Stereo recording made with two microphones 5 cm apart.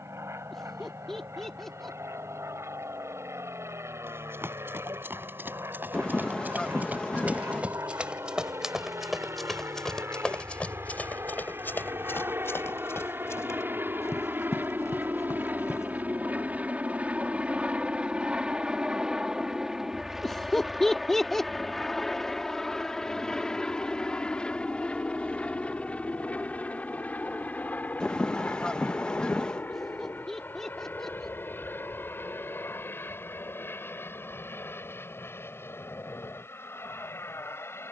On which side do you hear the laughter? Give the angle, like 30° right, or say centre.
10° left.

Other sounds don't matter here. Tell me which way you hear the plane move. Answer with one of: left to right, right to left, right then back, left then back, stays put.
right to left.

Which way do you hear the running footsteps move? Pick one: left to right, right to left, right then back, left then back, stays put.
right to left.